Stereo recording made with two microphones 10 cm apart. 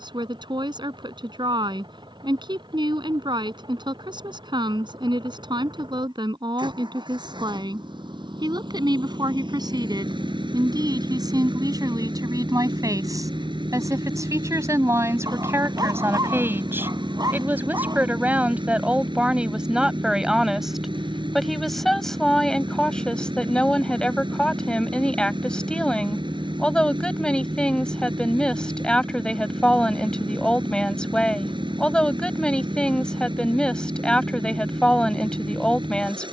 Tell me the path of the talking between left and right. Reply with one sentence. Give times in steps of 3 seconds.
In this clip you hear the talking on the right from 0 s and in the centre from 18 s.